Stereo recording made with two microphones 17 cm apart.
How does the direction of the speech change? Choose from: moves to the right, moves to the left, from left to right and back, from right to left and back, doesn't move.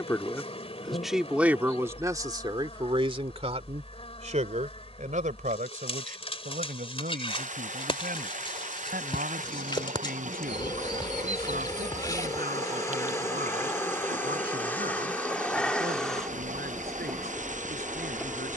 moves to the right.